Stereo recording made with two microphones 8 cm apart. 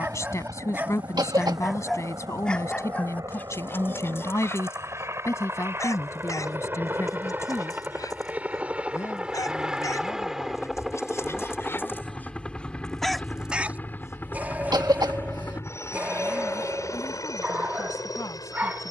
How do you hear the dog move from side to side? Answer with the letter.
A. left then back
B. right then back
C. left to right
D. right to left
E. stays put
A.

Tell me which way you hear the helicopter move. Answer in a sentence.
In this clip you hear the helicopter move to the left.